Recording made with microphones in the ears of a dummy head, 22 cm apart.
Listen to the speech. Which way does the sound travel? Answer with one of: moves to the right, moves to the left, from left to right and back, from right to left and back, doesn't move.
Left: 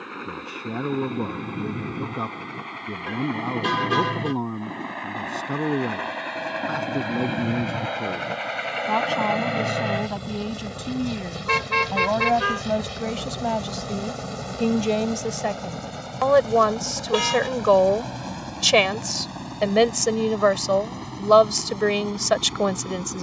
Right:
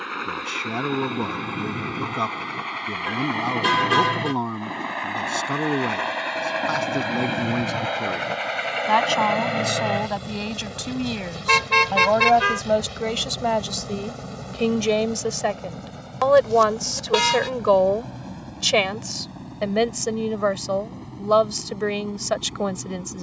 moves to the left.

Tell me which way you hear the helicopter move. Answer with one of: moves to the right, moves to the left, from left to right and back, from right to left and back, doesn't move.
moves to the left.